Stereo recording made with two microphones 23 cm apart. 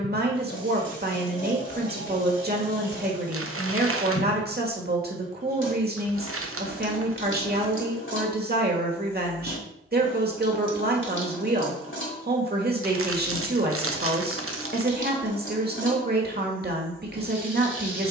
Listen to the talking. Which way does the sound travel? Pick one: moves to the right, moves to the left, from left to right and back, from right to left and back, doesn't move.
doesn't move.